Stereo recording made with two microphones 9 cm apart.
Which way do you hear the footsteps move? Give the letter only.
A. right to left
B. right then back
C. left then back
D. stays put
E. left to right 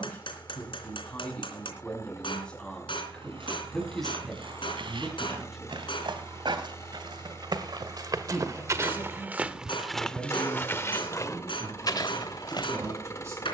A.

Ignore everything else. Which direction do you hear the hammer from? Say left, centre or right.
left.